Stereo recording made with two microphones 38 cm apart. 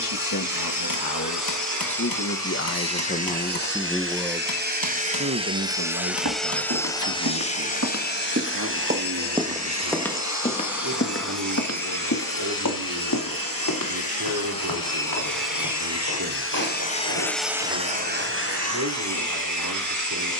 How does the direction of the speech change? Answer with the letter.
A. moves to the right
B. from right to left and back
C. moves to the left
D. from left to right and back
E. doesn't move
A.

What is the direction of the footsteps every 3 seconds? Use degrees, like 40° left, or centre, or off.
off, off, 40° right, 10° left, 60° left, 70° left, 70° left.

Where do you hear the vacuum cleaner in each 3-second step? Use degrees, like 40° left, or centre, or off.
50° right, 30° right, 20° left, 50° left, 60° left, 30° left, 50° right.